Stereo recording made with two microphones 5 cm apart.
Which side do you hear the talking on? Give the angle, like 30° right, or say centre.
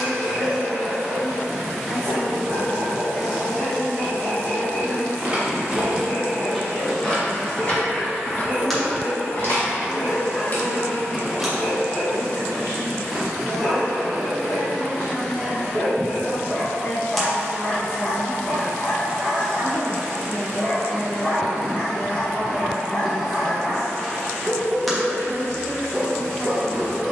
80° left.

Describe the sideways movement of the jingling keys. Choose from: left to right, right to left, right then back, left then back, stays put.
left then back.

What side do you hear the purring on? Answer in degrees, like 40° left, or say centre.
centre.